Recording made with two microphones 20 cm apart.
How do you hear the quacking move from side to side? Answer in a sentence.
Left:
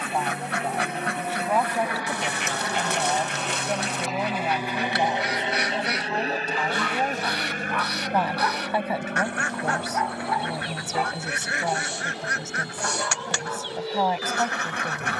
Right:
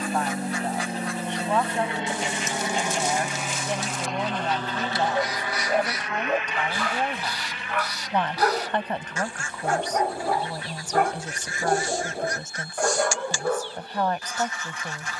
In this clip you hear the quacking stay in one place.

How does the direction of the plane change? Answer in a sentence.
In this clip you hear the plane move from right to left.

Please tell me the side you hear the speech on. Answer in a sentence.
In this clip you hear the speech in the centre.